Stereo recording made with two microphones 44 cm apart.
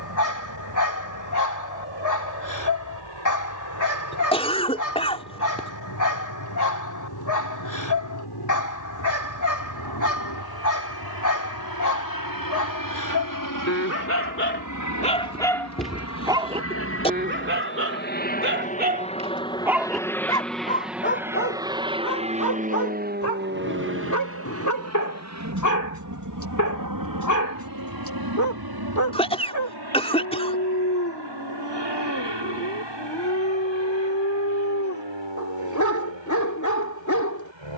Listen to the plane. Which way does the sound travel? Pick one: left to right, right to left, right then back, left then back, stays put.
left to right.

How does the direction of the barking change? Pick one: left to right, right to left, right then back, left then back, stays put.
right then back.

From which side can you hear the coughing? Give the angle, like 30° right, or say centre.
10° left.